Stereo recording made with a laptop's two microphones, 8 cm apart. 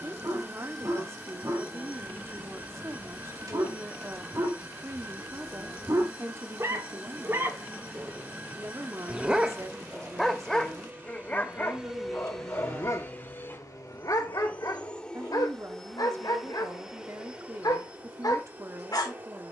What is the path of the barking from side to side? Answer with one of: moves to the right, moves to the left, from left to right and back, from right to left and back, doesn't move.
moves to the left.